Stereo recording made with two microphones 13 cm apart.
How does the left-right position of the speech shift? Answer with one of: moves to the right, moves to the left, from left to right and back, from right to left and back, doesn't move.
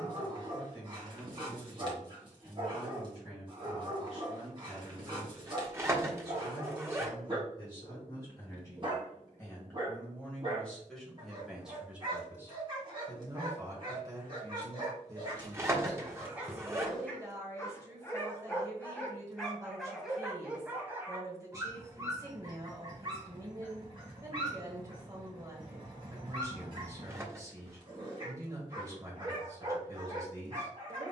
moves to the right.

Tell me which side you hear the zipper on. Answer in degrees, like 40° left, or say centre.
20° right.